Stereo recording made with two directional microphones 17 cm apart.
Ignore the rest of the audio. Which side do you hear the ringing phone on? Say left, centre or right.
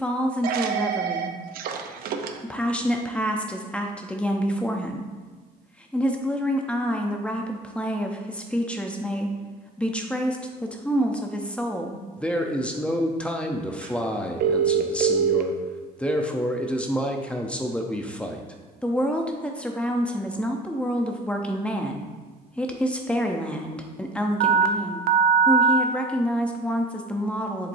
right.